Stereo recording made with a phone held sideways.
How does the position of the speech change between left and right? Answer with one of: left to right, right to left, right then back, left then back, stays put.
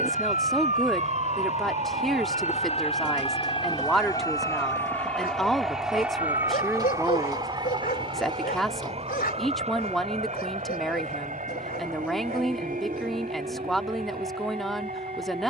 stays put.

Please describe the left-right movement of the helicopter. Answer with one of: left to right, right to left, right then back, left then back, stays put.
left to right.